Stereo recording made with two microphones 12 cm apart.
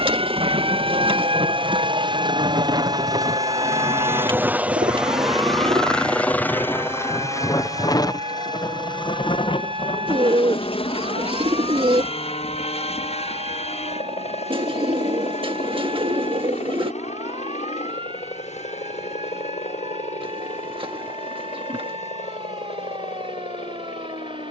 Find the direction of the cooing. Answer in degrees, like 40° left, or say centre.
50° right.